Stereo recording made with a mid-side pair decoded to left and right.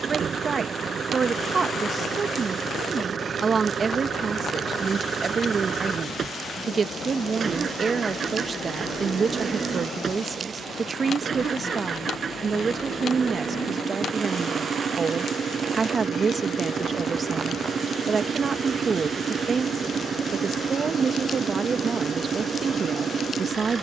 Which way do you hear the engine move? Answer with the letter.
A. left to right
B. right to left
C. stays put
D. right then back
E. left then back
C.